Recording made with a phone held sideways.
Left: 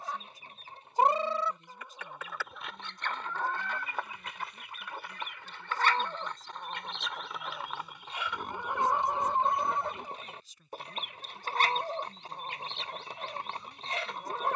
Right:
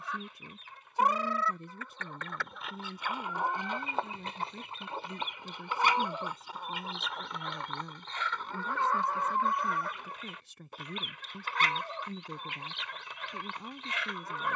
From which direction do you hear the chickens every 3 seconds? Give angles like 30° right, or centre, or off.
20° left, 20° right, centre, 30° left, 40° left.